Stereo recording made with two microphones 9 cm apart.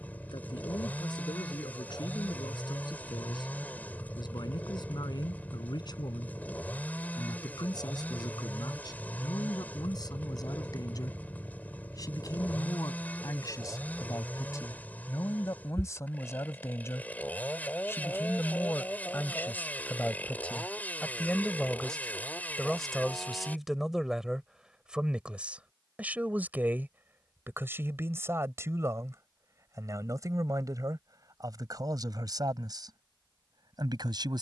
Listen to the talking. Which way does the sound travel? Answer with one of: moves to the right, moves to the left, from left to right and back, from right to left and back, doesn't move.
moves to the right.